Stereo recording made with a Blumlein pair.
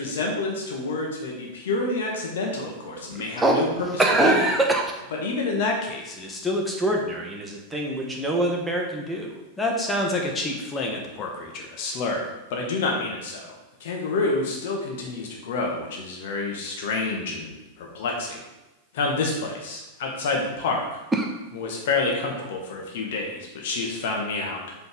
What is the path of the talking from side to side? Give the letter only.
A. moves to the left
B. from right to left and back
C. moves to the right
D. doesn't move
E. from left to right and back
E.